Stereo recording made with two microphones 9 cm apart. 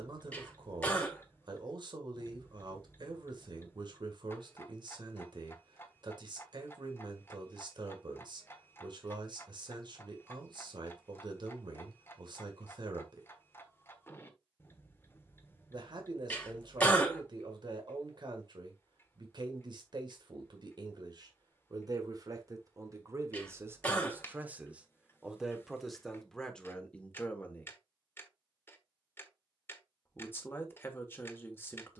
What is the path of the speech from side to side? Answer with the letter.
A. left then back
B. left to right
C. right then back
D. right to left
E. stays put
D.